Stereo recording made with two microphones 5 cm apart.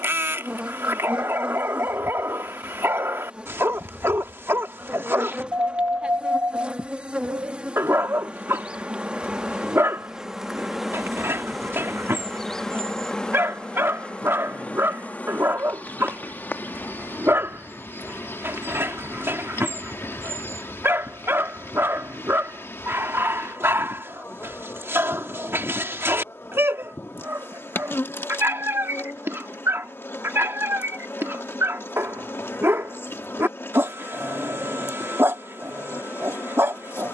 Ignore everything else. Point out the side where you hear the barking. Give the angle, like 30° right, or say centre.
50° right.